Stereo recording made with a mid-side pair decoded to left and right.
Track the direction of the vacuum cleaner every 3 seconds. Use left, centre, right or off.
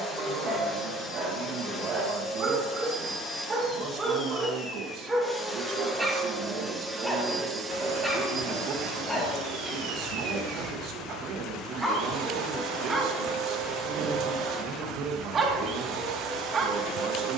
left, left, centre, right, right, right.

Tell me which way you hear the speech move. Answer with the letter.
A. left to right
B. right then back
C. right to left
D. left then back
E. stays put
E.